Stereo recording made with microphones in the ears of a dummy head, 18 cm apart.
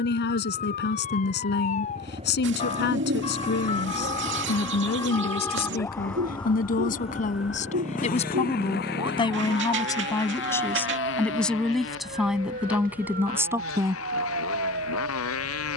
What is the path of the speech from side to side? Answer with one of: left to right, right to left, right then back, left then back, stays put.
left to right.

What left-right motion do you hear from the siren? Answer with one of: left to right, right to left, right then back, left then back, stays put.
left to right.